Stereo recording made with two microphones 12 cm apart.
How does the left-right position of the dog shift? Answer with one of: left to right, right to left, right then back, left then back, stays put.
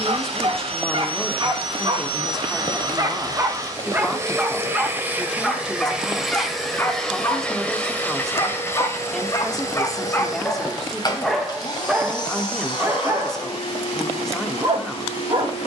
left then back.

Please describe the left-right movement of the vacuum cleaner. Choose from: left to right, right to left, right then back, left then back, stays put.
right to left.